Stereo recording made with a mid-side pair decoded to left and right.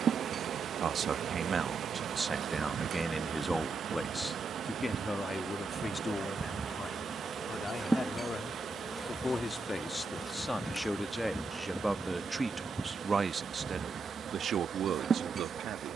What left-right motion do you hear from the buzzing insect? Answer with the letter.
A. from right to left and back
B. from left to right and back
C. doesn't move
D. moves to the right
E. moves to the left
A.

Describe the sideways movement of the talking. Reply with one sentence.
In this clip you hear the talking go left and come back.